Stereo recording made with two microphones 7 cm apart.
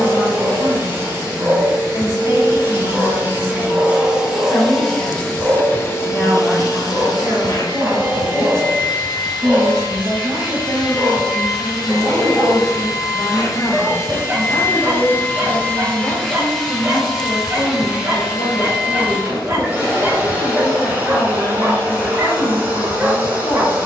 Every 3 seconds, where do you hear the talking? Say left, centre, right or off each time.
left, left, right, right, left, left, left, left.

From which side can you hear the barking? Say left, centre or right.
right.